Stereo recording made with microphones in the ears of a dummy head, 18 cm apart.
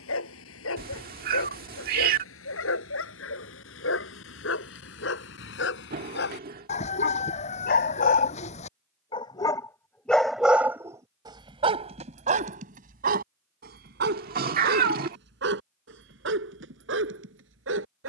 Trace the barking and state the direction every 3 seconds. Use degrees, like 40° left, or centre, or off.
80° left, 70° left, 50° left, 10° right, 50° right, 70° right.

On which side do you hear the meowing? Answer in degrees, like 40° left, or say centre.
50° right.